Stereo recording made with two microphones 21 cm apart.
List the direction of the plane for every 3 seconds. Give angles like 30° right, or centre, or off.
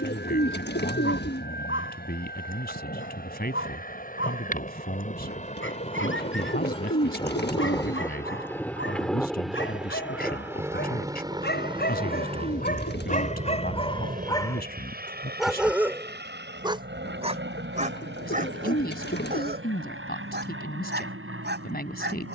60° left, 40° left, 20° left, 10° right, 30° right, 50° right, 60° right, 60° right.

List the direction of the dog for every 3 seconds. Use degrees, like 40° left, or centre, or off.
70° left, 70° left, 70° left, 60° left, 30° left, 10° right, 50° right, 60° right.